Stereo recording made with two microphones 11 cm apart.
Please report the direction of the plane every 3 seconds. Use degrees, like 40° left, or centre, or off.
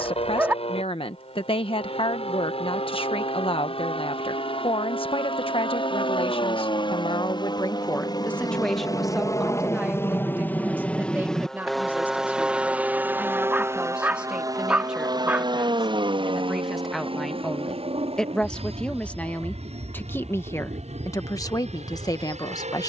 70° left, 60° left, 40° left, 20° left, 20° right, 40° right, 60° right, 70° right.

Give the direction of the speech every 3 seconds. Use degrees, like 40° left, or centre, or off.
50° left, 50° left, 30° left, 10° right, 10° right, centre, 20° left, 30° left.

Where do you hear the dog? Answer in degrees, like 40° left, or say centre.
10° right.